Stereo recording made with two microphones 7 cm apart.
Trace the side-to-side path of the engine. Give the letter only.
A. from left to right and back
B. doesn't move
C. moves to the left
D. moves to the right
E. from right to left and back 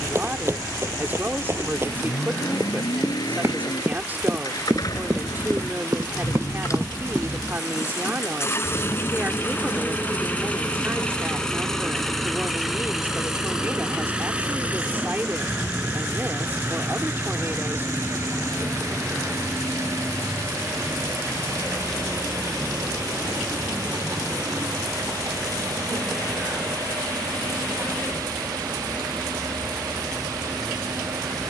D.